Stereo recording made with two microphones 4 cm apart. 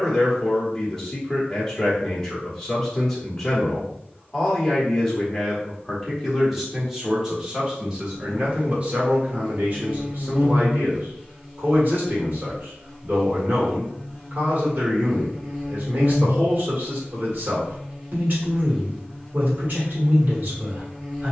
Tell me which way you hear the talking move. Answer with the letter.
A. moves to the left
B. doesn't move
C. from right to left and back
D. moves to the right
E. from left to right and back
D.